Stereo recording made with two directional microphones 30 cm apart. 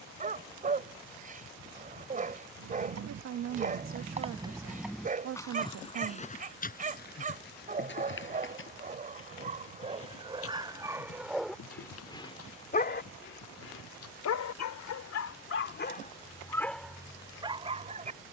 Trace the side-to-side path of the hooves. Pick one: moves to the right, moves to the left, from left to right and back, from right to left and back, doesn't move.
moves to the left.